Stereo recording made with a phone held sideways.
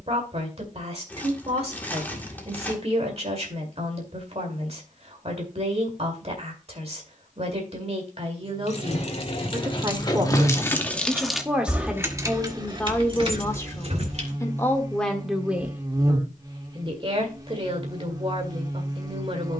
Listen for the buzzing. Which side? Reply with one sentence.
You can hear the buzzing on the right.